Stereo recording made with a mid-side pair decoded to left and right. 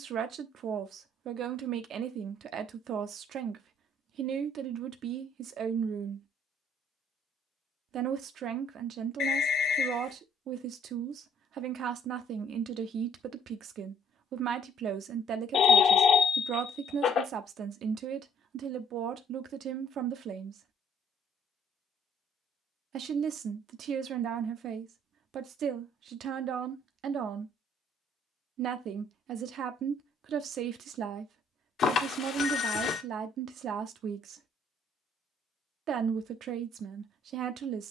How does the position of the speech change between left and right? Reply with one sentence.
In this clip you hear the speech stay put.